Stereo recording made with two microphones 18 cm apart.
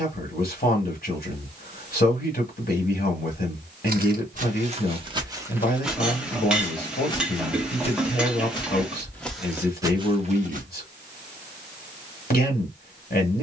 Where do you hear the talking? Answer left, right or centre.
left.